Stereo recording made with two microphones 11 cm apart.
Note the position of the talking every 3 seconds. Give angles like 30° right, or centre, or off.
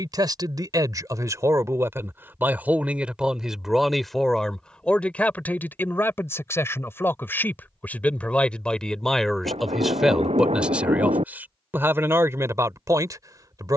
30° right, 10° left, 20° left, 10° right, 30° right.